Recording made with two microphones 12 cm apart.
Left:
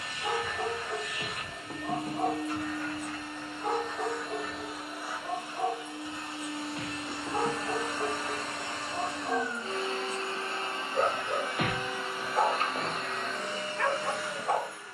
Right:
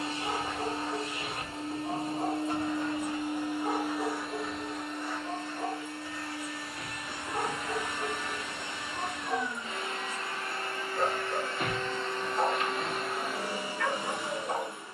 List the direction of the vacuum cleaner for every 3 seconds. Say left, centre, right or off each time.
right, centre, left, left, centre.